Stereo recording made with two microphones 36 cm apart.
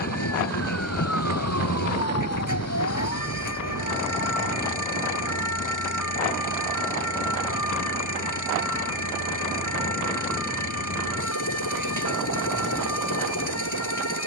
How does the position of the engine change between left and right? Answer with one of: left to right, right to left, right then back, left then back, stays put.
stays put.